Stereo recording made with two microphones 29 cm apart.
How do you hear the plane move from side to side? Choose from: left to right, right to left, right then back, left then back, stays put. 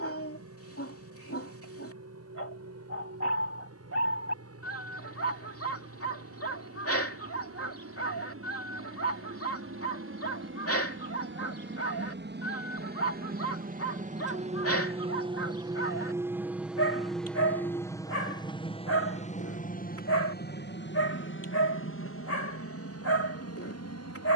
right to left.